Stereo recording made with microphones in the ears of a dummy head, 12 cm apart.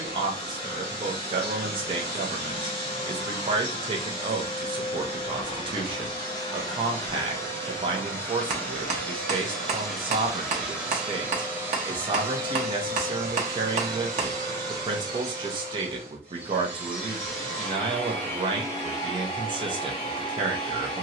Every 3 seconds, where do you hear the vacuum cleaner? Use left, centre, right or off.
left, left, left, centre, right, centre, left.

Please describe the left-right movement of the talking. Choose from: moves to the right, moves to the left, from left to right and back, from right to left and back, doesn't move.
doesn't move.